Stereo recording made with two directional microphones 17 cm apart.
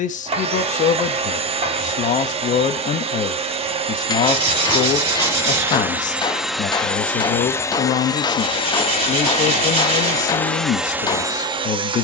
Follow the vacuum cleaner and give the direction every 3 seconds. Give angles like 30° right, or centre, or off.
30° right, 20° right, 10° left, 10° left.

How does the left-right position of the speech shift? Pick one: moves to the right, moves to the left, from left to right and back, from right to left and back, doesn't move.
doesn't move.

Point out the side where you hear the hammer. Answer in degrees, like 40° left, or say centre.
20° left.